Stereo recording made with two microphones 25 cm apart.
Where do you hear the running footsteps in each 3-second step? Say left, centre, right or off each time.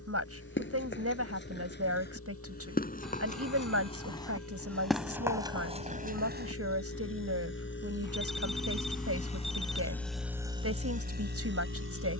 left, centre, right, off.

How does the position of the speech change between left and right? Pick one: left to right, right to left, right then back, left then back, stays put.
stays put.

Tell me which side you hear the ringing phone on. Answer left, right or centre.
centre.